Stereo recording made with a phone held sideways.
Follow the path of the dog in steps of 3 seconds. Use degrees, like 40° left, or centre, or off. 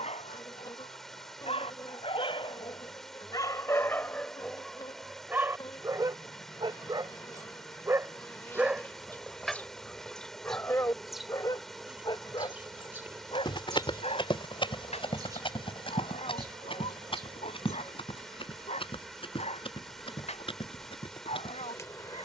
50° left, centre, 20° right, 10° left, 50° left, 60° left, 60° left, 60° left.